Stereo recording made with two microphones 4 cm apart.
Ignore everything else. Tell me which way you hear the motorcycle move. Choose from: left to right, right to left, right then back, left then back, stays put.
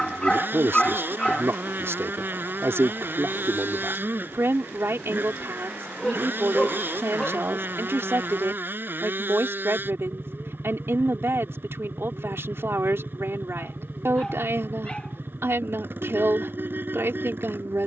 stays put.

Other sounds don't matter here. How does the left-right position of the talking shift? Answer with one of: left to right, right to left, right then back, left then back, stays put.
stays put.